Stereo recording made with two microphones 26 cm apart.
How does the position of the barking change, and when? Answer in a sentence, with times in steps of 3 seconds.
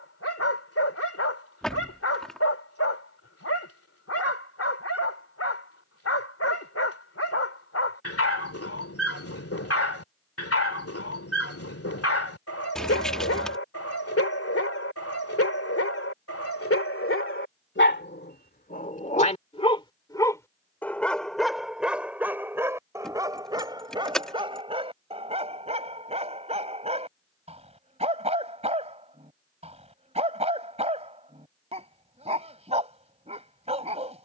You can hear the barking on the left from 0 s, in the centre from 21 s and on the right from 24 s.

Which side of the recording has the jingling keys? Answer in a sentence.
You can hear the jingling keys in the centre.